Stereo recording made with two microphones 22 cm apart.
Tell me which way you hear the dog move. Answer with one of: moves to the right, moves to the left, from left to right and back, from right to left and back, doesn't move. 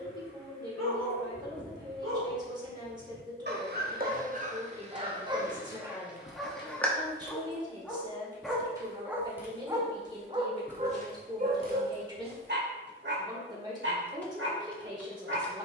from right to left and back.